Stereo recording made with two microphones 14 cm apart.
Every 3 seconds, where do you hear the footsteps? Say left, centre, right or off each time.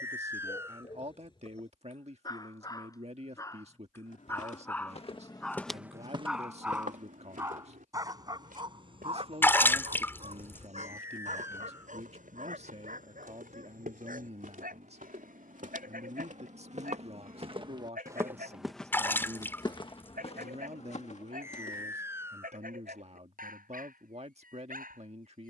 off, left, right, right, right, right, left, left, off.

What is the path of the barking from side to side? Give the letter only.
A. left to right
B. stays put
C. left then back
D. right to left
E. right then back
A.